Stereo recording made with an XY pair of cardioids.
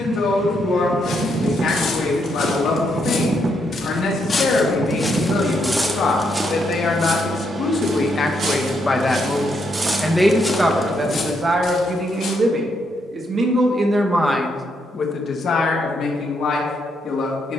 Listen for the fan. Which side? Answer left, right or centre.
right.